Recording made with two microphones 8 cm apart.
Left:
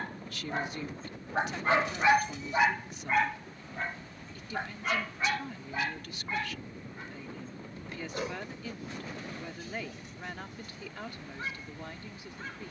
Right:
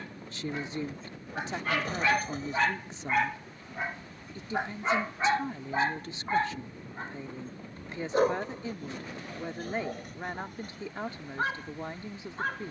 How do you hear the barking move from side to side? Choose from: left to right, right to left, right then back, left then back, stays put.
left to right.